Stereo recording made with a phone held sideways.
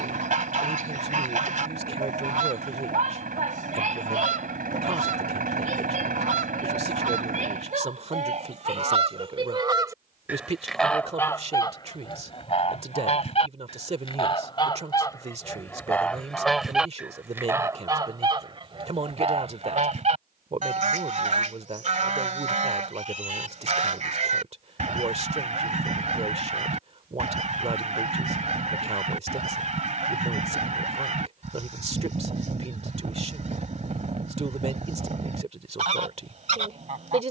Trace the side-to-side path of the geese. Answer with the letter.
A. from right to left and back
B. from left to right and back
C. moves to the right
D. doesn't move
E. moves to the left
A.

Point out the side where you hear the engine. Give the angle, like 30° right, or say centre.
60° right.